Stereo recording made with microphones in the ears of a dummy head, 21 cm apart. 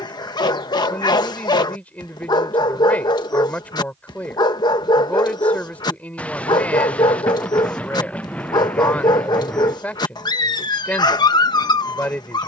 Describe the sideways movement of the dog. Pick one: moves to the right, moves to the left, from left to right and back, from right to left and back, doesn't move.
doesn't move.